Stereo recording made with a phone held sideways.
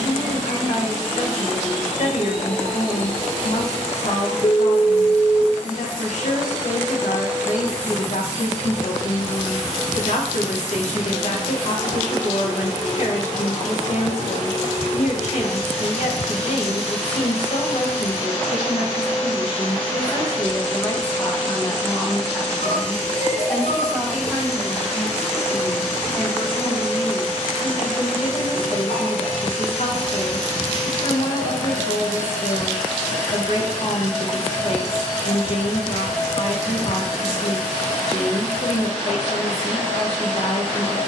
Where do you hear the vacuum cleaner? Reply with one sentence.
In this clip you hear the vacuum cleaner on the left.